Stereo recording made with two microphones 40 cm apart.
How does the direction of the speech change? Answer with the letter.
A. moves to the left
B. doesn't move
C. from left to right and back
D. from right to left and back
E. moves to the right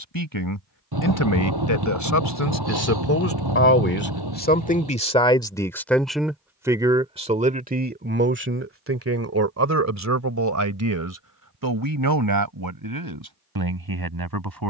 E.